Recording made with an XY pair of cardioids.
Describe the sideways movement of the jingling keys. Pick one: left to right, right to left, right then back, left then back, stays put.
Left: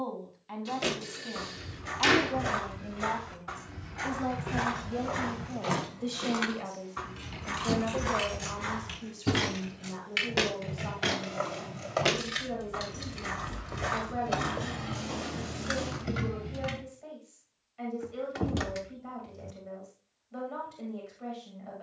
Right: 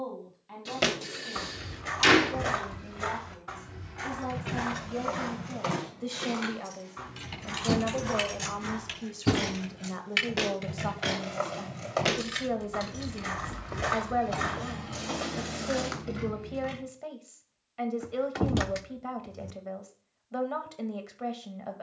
right to left.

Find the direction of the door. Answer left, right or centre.
right.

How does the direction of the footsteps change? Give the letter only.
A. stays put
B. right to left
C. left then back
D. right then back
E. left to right
C.